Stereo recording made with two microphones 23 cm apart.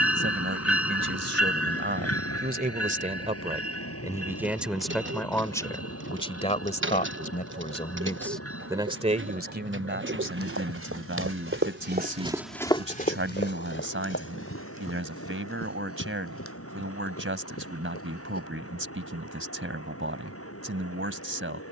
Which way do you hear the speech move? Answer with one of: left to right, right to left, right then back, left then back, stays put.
left then back.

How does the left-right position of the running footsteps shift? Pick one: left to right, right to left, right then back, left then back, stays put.
right to left.